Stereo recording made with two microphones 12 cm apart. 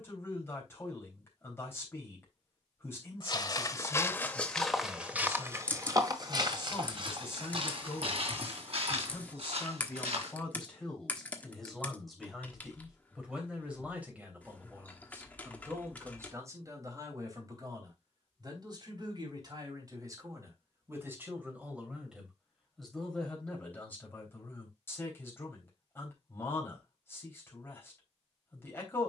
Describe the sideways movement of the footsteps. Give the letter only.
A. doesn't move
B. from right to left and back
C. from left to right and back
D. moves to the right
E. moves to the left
D.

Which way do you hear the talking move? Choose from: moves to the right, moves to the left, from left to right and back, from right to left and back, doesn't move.
from left to right and back.